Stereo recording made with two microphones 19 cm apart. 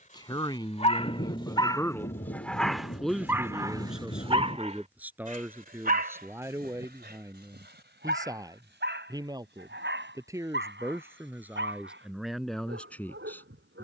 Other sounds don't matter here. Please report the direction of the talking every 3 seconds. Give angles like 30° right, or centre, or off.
20° left, 10° right, 10° right, 10° right, centre.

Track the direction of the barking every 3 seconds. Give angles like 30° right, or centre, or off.
20° left, 30° right, 60° right, 70° right, 80° right.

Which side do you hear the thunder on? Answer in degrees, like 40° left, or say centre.
40° left.